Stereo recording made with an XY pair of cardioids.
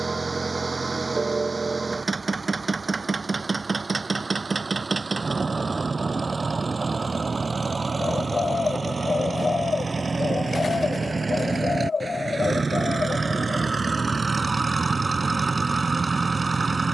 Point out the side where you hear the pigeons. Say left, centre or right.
left.